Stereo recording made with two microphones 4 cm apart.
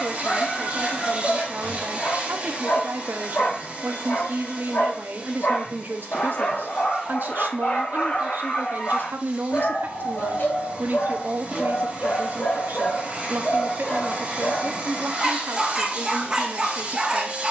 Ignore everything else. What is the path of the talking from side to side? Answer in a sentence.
You can hear the talking stay put.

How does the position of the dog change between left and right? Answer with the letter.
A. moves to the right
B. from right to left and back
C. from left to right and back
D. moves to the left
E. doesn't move
A.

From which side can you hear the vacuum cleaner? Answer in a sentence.
In this clip you hear the vacuum cleaner on the right.